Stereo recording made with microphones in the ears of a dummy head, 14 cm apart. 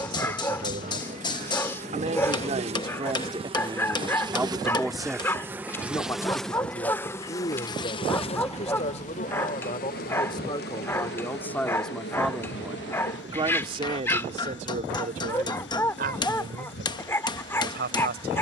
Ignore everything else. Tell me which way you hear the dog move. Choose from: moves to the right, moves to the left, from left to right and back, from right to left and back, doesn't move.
doesn't move.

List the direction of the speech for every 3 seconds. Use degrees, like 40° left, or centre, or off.
50° right, 10° right, 30° left, 30° left, 30° right, 60° right.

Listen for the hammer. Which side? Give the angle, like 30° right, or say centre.
30° left.